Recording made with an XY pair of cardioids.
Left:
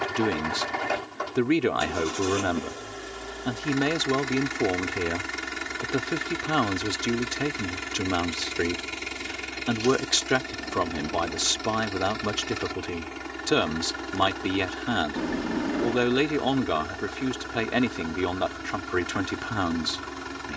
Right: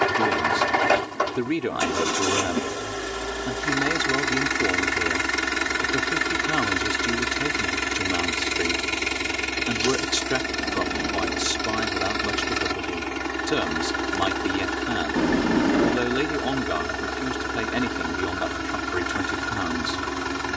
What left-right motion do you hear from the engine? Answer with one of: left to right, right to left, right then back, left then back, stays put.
stays put.